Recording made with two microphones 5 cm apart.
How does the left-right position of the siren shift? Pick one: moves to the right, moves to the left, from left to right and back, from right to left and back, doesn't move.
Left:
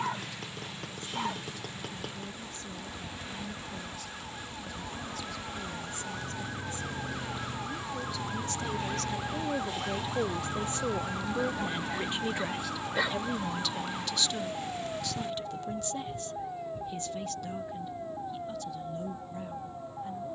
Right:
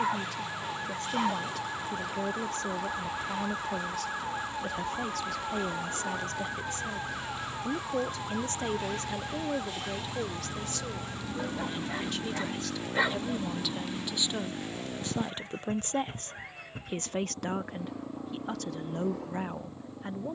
moves to the left.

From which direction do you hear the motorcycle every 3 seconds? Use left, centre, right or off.
left, left, left, centre, right, right, right.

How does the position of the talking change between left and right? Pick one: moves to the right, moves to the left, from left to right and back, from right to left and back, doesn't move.
from right to left and back.